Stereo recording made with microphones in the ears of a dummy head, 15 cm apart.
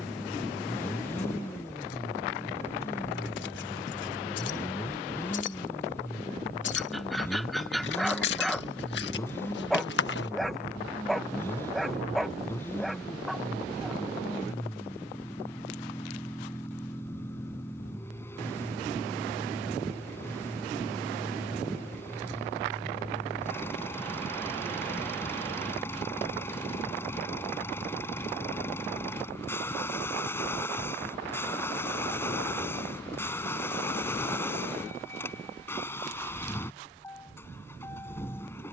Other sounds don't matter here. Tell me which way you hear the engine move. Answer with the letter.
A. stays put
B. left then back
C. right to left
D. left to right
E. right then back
A.